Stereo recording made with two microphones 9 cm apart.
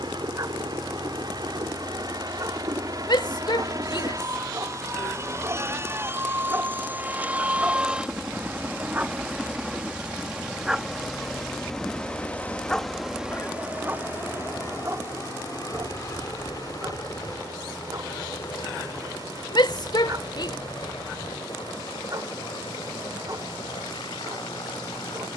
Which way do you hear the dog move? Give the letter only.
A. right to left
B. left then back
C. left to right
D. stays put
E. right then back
B.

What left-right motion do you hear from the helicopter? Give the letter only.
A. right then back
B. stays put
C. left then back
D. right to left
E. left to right
D.